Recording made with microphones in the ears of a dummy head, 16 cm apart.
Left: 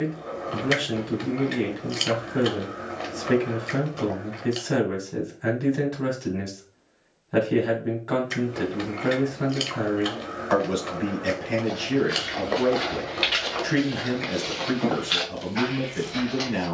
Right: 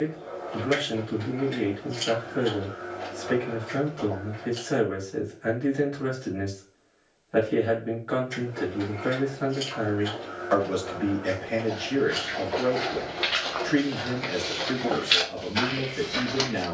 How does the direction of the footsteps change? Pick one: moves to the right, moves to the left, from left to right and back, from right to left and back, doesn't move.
moves to the right.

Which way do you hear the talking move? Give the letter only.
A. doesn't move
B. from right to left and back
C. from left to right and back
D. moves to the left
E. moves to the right
A.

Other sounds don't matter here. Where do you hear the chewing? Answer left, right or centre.
left.